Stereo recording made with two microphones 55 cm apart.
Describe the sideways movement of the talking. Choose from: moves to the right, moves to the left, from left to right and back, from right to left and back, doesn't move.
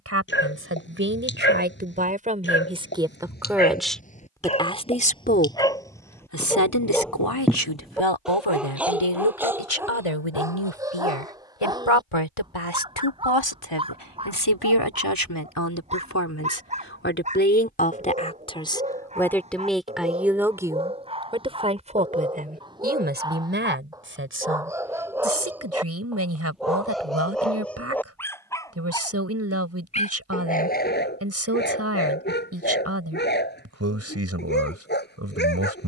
from right to left and back.